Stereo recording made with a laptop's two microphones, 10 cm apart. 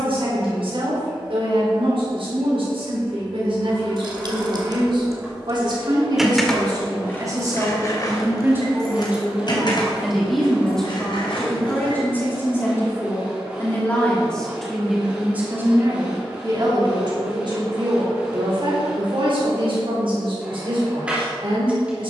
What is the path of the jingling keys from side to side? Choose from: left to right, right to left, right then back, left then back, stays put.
right to left.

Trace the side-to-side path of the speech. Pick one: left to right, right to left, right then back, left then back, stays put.
left then back.